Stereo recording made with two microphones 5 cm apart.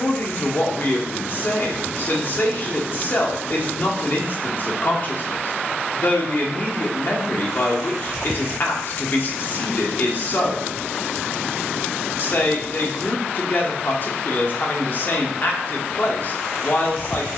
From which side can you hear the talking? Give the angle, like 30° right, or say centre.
50° left.